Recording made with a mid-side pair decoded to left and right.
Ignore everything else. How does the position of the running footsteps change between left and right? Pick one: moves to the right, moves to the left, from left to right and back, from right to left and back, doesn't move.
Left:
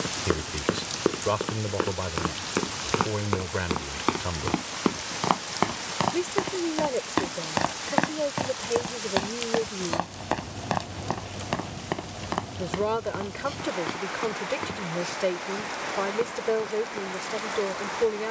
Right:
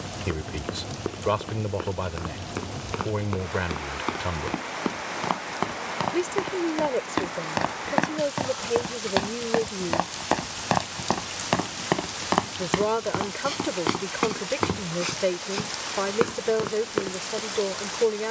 moves to the right.